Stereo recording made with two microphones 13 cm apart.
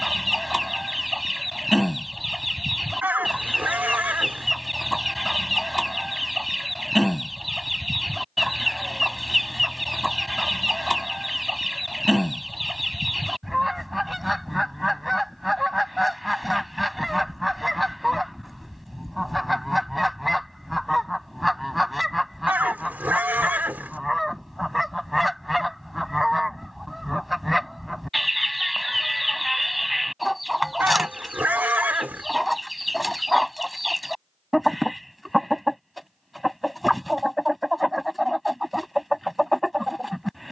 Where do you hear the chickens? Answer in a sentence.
You can hear the chickens in the centre.